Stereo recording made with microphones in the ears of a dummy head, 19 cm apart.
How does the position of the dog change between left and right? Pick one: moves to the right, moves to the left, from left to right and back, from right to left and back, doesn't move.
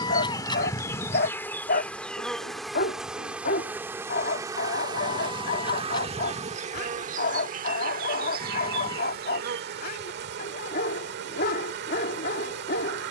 doesn't move.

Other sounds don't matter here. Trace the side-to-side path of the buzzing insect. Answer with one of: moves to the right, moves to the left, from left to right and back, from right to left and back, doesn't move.
moves to the right.